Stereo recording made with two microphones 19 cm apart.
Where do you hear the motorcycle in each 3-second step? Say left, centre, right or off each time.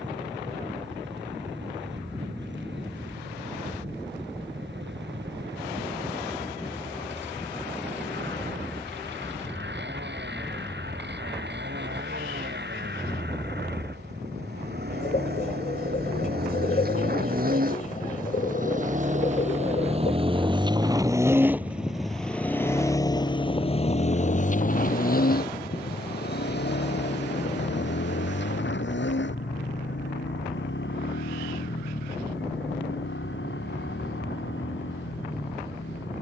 right, right, right, right, right, right, right, centre, left, left, left, left.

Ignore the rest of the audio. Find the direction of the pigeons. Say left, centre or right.
left.